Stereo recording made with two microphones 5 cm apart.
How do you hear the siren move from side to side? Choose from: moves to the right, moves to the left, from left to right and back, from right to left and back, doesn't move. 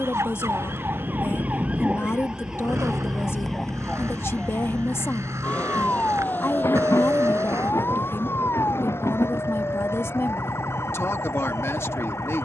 moves to the left.